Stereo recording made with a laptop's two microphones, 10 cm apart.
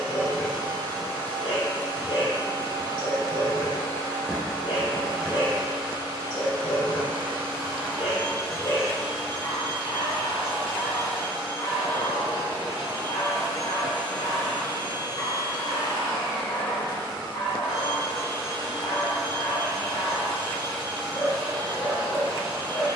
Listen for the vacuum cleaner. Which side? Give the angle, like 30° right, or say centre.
10° right.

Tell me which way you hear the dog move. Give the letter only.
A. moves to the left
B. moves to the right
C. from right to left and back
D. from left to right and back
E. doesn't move
E.